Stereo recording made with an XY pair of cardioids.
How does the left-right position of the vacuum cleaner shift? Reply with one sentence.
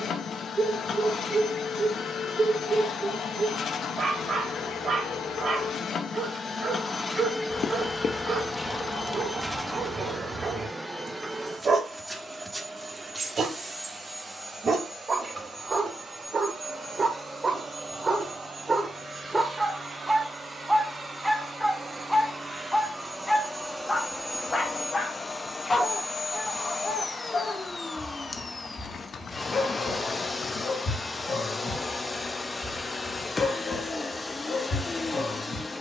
You can hear the vacuum cleaner move from left to right and back again.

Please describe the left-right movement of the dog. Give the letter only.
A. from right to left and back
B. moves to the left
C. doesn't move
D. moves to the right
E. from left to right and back
B.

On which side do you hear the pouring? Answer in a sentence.
In this clip you hear the pouring on the left.